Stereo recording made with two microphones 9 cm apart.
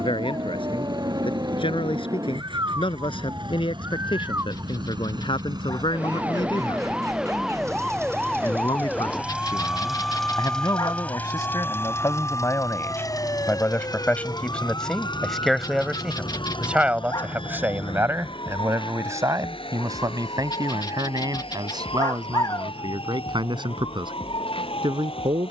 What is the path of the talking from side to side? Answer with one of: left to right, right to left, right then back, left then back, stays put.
left to right.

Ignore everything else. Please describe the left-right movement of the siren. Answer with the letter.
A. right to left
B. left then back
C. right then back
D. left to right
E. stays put
A.